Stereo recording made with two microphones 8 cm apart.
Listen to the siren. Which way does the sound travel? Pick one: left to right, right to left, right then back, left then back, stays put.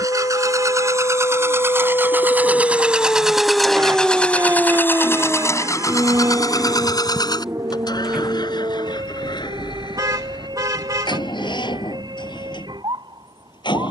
left to right.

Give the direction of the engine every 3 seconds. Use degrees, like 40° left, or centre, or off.
30° right, 20° left, 60° left, 70° left, 80° left.